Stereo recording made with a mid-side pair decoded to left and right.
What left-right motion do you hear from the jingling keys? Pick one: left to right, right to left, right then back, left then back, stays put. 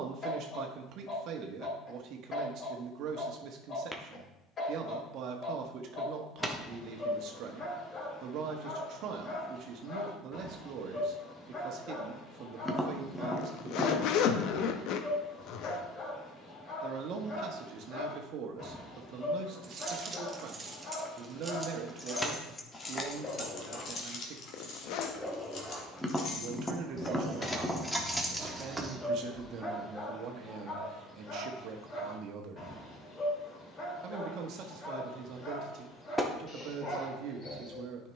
left then back.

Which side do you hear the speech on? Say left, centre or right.
right.